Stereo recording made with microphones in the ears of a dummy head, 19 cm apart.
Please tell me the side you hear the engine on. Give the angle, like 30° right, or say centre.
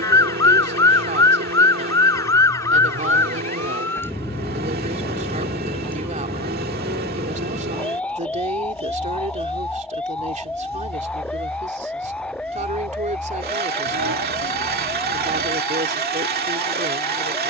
50° right.